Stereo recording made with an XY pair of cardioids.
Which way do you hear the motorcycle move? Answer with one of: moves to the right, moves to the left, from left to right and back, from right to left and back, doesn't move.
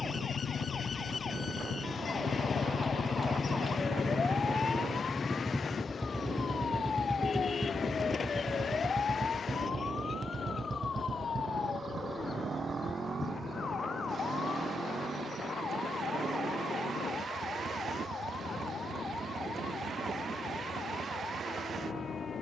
moves to the right.